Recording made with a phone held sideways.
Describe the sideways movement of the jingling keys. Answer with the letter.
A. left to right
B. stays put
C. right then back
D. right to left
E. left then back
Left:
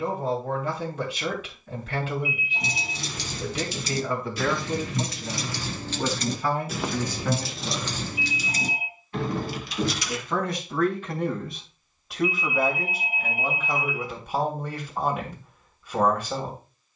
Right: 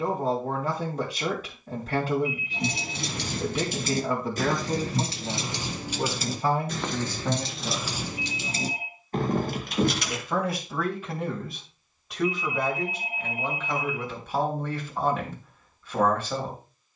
E.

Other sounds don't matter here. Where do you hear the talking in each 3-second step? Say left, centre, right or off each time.
right, right, right, centre, centre, centre.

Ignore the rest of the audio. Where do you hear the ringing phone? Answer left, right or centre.
centre.